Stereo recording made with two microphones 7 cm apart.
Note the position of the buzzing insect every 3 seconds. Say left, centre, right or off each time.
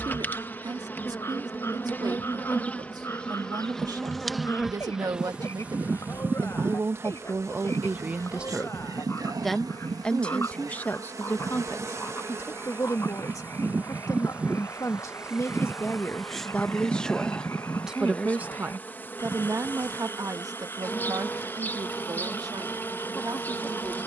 left, centre, right, right, right, centre, left, left.